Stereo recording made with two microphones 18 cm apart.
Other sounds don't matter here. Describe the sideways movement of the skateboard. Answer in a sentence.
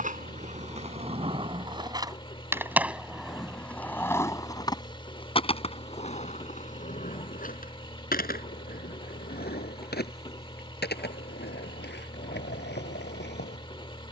In this clip you hear the skateboard travel towards the left.